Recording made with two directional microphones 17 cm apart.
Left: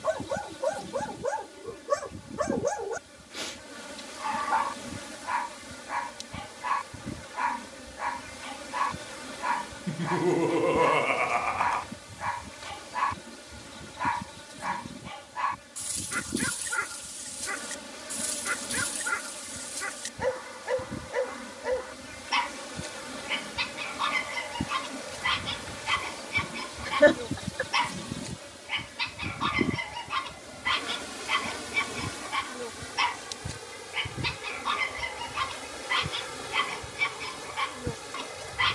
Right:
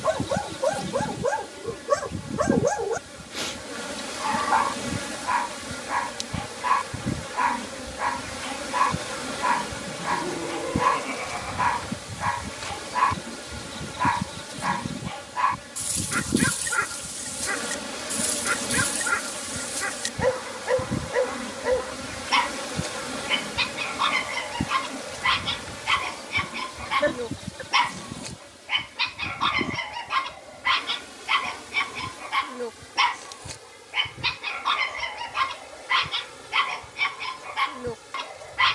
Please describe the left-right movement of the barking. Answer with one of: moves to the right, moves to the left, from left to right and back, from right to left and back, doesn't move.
doesn't move.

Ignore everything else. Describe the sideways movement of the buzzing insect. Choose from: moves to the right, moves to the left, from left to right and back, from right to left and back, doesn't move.
moves to the left.